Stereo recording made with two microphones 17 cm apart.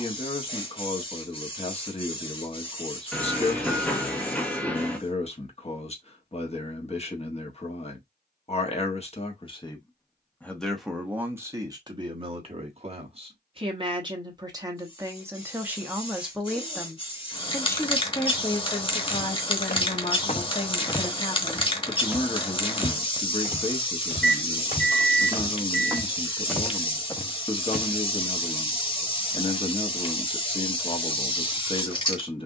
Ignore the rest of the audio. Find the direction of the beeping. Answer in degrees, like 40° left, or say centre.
10° left.